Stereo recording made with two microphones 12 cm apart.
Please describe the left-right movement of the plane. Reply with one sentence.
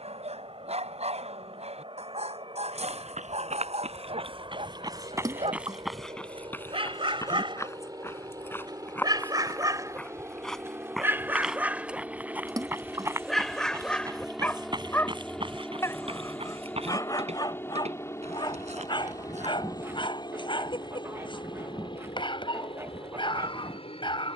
In this clip you hear the plane move to the left.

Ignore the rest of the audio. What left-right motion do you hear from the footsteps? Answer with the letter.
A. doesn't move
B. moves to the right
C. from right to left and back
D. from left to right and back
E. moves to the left
C.